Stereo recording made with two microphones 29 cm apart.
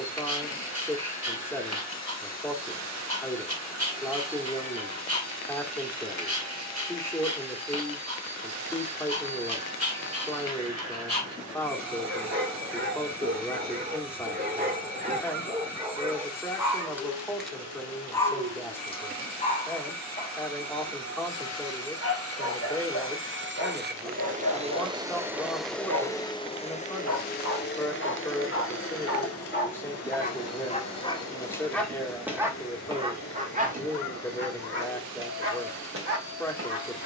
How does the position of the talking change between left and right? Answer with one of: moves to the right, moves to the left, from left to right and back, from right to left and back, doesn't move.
doesn't move.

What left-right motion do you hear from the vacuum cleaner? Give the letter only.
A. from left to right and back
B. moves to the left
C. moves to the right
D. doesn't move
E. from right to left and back
B.